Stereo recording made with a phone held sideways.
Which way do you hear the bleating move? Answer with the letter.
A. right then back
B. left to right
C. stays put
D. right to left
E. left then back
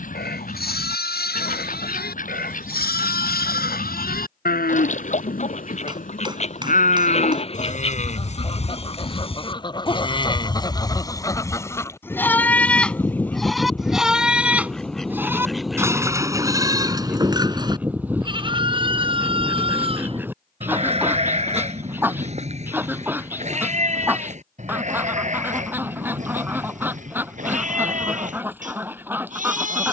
B.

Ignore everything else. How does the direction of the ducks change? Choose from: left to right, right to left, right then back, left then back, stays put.
left to right.